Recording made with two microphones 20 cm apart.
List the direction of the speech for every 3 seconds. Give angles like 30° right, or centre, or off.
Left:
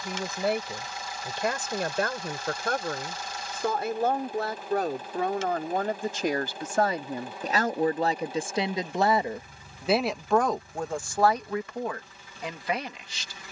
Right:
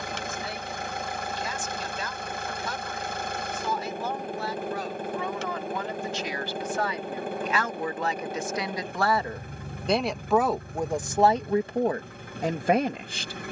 60° left, 50° left, 40° left, 10° right, 50° right.